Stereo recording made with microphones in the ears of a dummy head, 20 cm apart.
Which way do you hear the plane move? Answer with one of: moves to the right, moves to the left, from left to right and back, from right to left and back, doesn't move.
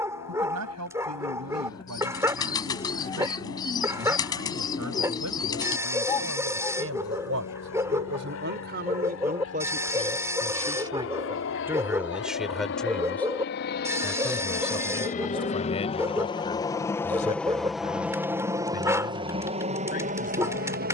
moves to the right.